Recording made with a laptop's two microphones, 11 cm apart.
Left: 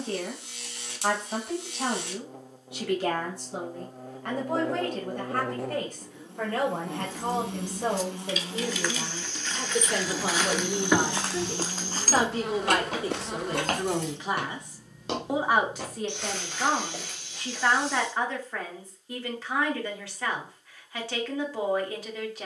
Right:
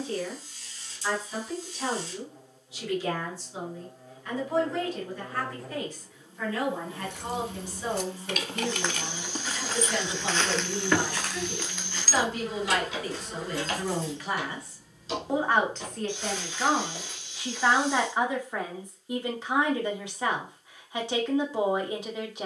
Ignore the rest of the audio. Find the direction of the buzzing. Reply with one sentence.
You can hear the buzzing on the left.